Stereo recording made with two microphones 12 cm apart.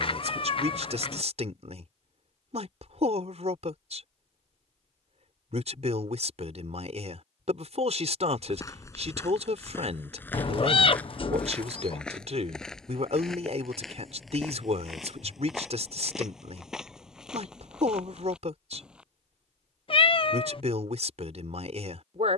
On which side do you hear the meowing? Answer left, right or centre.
left.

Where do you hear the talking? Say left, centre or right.
right.